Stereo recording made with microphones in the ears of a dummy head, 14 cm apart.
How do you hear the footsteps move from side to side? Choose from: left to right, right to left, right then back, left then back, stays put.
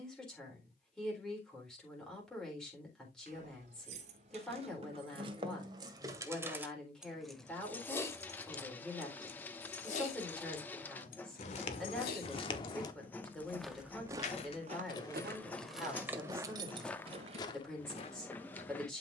right then back.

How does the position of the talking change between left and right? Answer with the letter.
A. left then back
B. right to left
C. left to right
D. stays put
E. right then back
D.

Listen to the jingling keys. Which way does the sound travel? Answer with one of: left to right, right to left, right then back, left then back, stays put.
left then back.